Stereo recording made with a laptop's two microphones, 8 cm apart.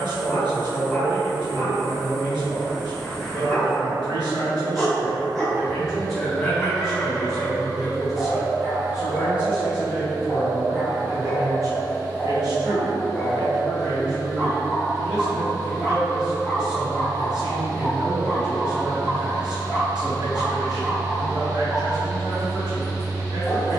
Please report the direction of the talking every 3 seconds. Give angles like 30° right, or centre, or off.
60° right, 40° right, centre, 30° right, 60° right, 60° right, 60° right, 60° right.